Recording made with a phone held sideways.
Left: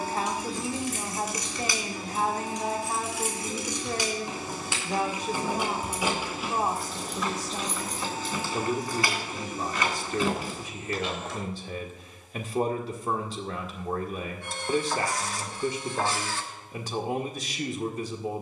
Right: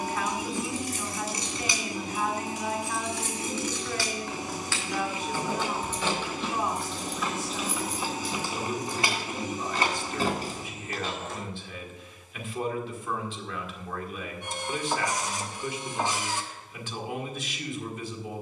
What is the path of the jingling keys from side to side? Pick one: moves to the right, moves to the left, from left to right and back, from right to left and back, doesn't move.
from right to left and back.